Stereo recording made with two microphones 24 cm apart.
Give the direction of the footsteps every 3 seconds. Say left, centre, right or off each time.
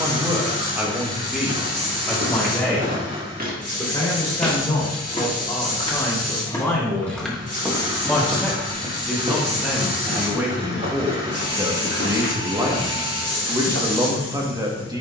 right, centre, centre, right, right.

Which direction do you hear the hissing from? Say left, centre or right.
left.